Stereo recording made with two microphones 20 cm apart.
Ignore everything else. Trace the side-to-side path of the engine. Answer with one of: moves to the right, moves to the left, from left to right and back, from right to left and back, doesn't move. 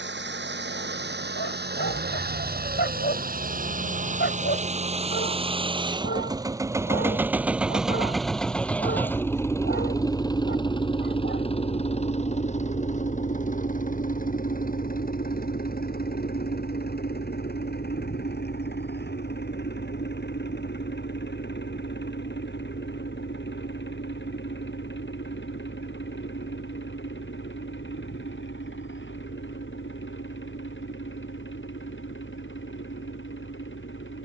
moves to the left.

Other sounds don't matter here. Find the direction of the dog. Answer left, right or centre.
left.